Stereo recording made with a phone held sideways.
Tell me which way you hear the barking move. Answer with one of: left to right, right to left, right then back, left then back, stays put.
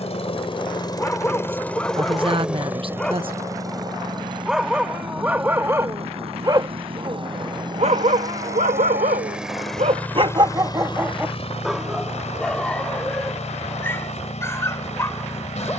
right then back.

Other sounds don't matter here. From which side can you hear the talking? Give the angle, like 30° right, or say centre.
40° right.